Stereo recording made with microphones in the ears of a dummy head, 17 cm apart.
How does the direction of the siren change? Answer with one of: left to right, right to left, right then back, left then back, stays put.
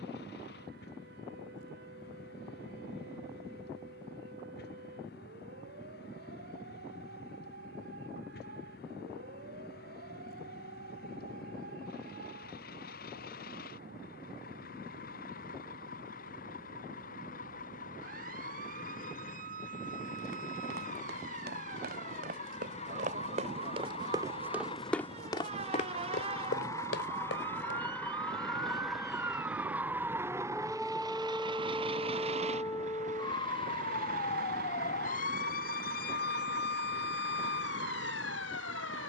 right to left.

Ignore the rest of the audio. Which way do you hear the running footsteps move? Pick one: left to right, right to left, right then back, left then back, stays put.
right to left.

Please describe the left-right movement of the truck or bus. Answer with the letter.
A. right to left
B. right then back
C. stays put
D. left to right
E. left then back
D.